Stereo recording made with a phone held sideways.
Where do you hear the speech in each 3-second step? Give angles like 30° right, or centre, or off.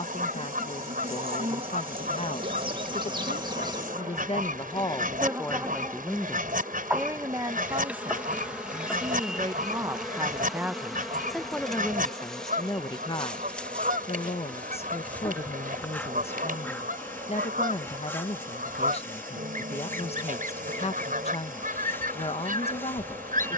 50° left, 30° left, 20° right, 10° right, 30° left, 50° left, 50° left, 50° left.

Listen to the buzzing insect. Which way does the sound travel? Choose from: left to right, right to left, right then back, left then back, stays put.
right to left.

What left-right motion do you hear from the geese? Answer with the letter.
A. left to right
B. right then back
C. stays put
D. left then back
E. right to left
C.